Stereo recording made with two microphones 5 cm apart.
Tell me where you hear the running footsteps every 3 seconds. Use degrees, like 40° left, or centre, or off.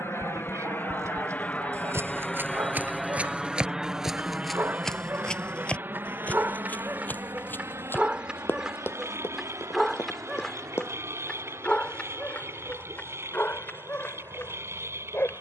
40° right, centre, 30° left, 50° left, off.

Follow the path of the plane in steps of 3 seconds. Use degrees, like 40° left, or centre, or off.
30° left, 20° right, 50° right, 60° right, 60° right.